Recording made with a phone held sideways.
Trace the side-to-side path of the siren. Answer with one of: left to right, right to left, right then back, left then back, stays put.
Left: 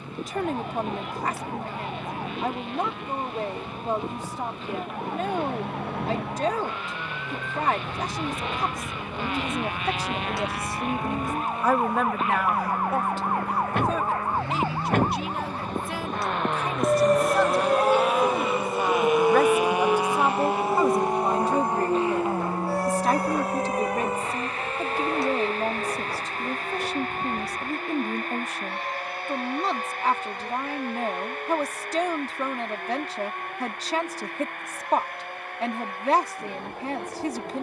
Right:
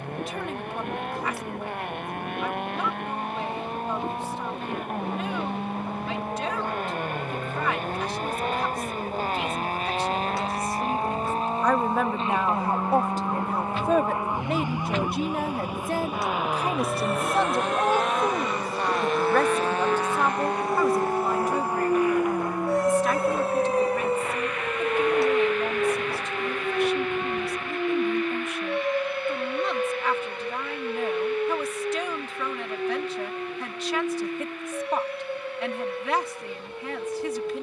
left to right.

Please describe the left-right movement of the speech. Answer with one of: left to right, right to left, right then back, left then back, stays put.
right then back.